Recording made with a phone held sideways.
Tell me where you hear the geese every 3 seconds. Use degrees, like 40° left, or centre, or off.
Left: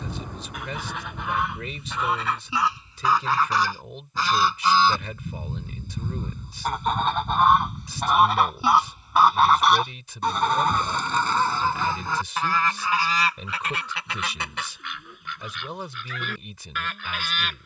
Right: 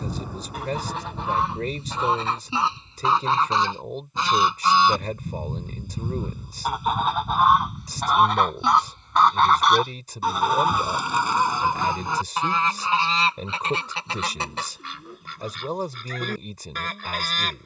30° right, 20° right, centre, 10° right, 30° right, 40° right.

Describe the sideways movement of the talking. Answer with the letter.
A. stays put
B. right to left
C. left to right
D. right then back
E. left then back
A.